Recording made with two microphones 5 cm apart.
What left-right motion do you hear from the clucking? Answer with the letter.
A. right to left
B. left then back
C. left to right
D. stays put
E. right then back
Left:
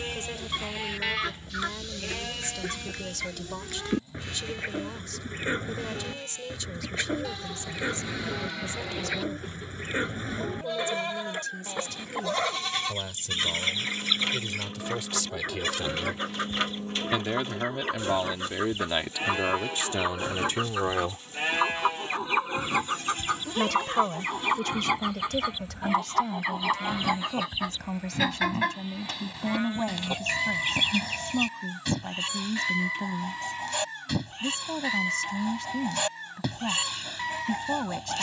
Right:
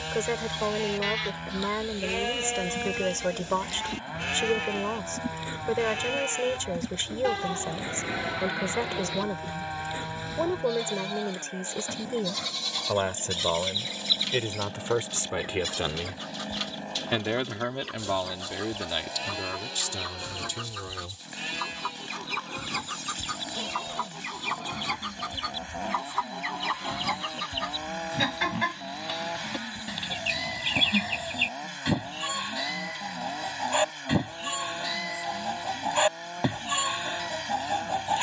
C.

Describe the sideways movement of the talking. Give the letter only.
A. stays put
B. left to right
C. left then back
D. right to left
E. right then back
D.